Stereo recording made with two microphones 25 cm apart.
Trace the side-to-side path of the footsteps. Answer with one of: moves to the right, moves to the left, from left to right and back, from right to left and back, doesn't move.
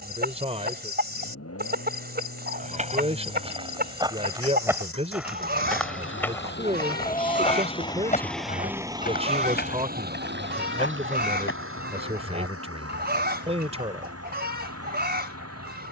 moves to the left.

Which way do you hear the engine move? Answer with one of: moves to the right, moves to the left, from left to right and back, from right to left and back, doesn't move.
moves to the right.